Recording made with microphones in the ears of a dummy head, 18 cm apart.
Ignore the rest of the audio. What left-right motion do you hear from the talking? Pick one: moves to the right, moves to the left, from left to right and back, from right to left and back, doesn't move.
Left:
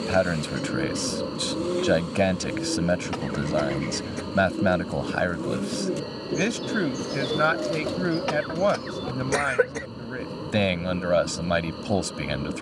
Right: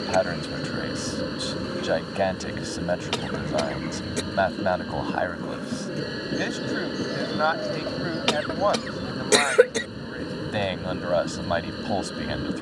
doesn't move.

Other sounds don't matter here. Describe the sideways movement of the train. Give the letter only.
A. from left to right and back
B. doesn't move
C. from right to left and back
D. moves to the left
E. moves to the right
B.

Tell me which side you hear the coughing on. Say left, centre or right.
right.